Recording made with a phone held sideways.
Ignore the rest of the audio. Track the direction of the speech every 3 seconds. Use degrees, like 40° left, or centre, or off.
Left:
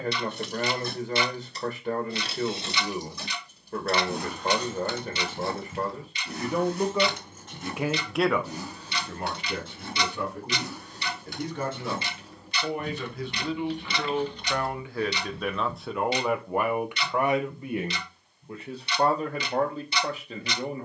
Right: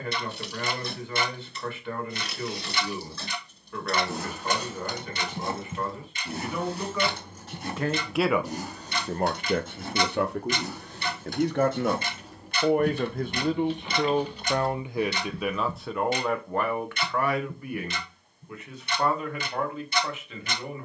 40° left, 40° left, 10° left, 70° right, 40° right, 10° left, 40° left.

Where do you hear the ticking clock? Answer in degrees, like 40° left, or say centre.
50° right.